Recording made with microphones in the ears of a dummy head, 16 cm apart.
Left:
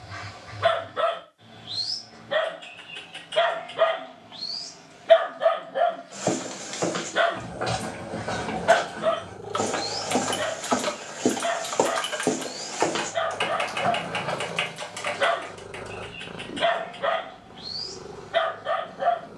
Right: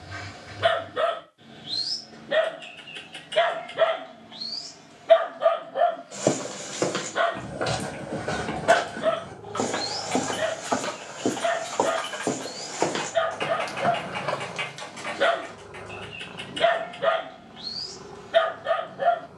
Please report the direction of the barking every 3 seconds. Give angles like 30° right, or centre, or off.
40° right, 10° right, 10° left, 30° right, 30° right, 30° right, 30° right.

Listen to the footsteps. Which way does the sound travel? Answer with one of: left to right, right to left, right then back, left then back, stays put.
left then back.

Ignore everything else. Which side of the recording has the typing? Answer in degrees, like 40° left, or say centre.
70° left.